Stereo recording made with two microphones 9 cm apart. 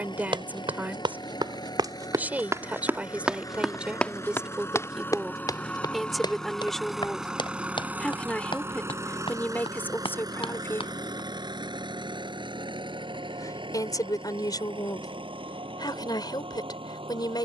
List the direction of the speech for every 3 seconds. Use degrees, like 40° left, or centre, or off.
20° right, 10° right, 10° left, 20° left, 40° left, 50° left.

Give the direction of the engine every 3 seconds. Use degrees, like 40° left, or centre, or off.
50° left, 30° left, 10° right, 50° right, 60° right, 70° right.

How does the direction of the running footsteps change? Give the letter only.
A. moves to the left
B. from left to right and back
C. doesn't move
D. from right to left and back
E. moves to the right
A.